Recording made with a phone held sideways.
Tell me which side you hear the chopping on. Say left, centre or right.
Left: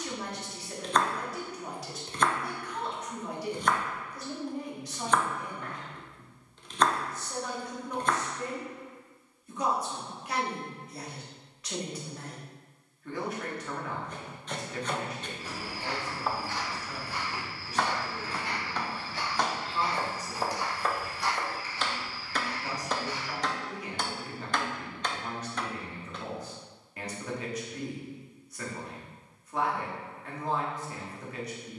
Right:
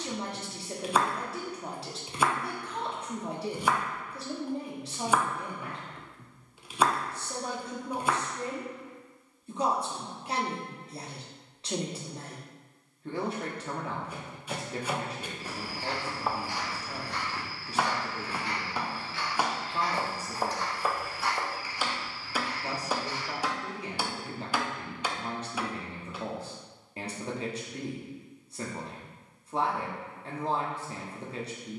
centre.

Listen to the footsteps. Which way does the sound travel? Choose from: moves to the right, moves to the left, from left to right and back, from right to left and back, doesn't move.
from right to left and back.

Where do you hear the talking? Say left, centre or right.
right.